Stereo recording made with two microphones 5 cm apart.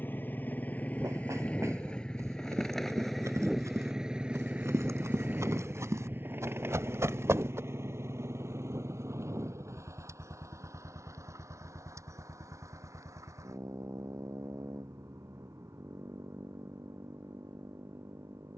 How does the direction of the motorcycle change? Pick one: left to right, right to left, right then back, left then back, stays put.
left to right.